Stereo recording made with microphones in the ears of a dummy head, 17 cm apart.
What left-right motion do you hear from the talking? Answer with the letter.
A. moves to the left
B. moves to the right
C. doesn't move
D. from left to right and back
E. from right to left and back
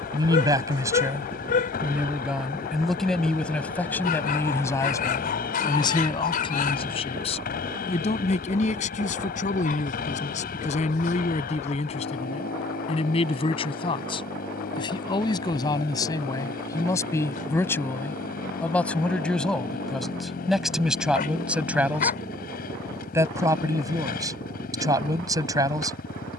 E.